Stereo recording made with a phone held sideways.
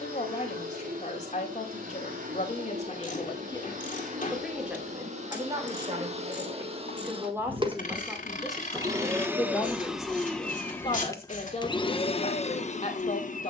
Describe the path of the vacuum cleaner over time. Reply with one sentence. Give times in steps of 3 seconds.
You can hear the vacuum cleaner on the right from 0 s, in the centre from 9 s and on the left from 12 s.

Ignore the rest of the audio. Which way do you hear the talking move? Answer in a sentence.
In this clip you hear the talking go right and come back.